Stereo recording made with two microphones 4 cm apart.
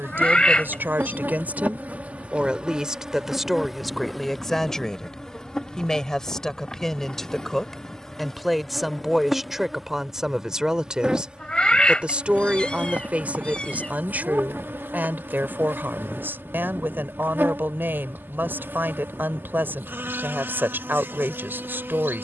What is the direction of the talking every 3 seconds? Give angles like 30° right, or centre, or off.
40° right, 10° left, 10° left, 10° right, 30° right, 50° right, 50° right, 50° right.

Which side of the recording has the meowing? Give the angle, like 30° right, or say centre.
20° left.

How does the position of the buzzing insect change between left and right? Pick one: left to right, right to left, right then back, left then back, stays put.
left then back.